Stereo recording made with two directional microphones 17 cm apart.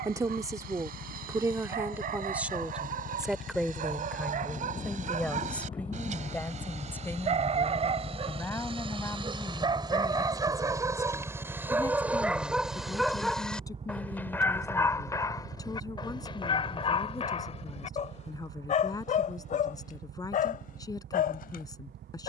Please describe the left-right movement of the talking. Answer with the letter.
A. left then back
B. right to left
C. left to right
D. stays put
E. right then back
B.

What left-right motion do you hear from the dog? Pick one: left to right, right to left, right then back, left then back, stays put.
right to left.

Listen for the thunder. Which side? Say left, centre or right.
left.